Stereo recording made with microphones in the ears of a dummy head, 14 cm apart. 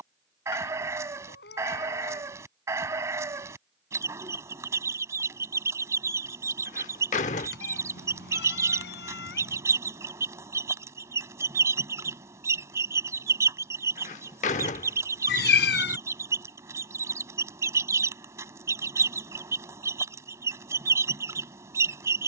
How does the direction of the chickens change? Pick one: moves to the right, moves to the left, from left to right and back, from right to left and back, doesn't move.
doesn't move.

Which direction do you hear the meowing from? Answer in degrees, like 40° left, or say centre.
70° left.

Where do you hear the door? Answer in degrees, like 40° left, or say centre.
40° left.